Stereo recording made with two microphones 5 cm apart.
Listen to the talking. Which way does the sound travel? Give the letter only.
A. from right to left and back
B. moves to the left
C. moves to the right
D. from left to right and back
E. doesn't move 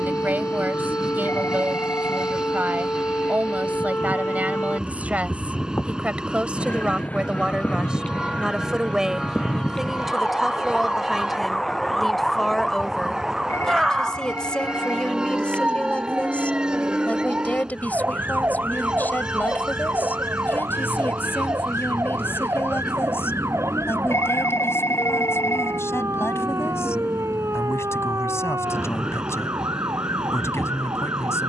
B.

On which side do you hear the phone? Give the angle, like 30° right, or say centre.
70° left.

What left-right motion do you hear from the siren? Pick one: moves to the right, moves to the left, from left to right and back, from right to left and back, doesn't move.
moves to the right.